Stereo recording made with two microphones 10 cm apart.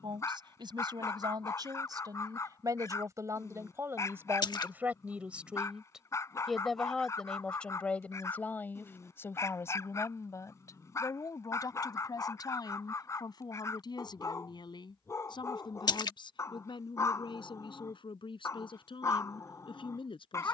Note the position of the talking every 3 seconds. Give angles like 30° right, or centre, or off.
40° right, 20° right, 10° left, 30° left, 50° left, 60° left, 60° left.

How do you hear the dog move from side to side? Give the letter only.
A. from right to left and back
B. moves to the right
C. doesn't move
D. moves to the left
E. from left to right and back
C.